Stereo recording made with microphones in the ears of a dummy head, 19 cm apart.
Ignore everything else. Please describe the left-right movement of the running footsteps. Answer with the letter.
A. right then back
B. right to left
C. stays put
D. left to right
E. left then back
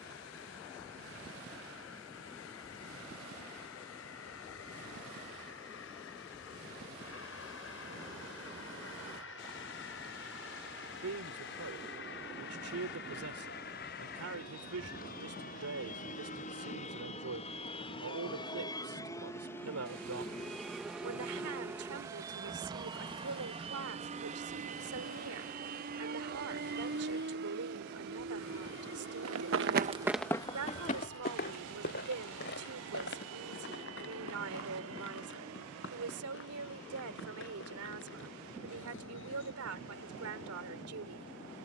B.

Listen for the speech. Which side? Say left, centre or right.
right.